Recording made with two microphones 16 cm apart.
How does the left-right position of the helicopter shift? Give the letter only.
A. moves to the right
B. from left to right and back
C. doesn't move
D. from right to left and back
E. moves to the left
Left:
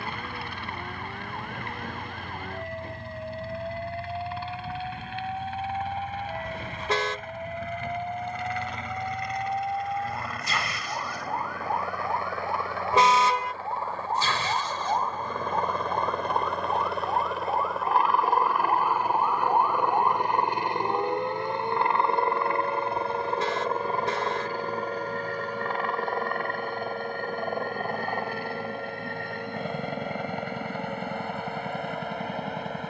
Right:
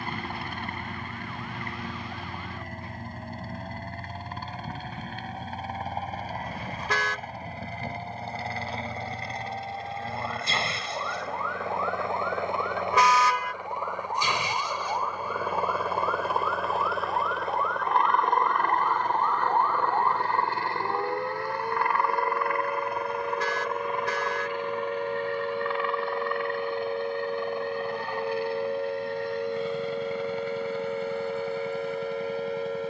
E.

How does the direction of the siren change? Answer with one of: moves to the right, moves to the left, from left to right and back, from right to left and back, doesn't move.
moves to the right.